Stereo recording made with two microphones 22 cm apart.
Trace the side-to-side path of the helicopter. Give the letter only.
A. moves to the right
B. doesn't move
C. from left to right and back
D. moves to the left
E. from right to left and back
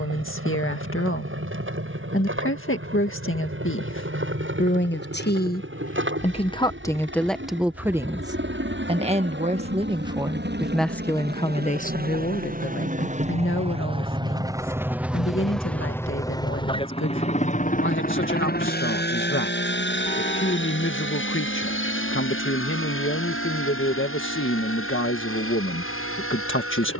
D.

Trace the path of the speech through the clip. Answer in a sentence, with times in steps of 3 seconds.
In this clip you hear the speech on the left from 0 s, in the centre from 6 s and on the left from 12 s.